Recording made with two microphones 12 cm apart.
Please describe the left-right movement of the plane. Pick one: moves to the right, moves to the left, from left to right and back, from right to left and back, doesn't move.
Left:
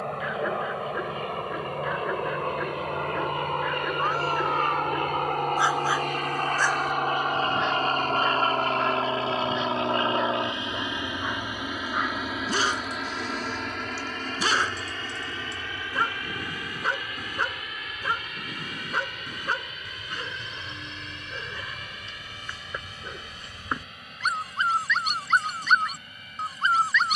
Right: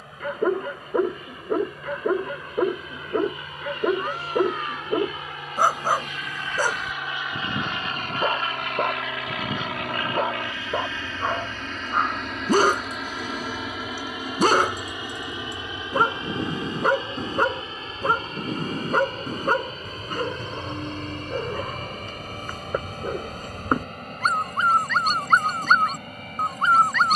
moves to the right.